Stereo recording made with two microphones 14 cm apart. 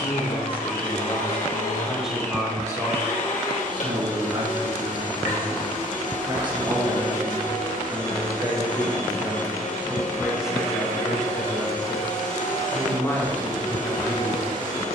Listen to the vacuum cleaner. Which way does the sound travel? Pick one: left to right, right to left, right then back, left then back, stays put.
stays put.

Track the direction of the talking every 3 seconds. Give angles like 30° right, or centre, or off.
10° left, 40° right, 30° right, centre, 20° left.